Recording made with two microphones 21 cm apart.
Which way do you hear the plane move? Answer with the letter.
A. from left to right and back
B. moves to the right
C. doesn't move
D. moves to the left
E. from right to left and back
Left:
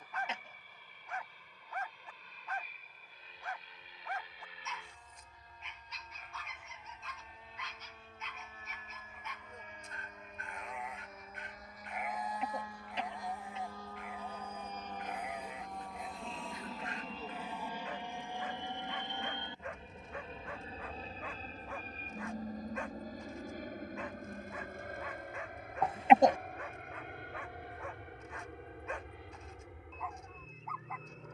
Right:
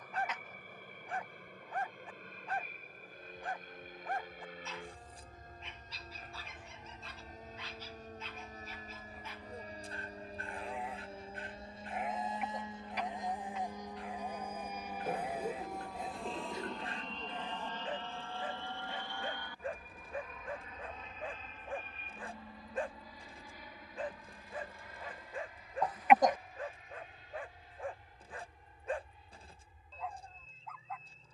D.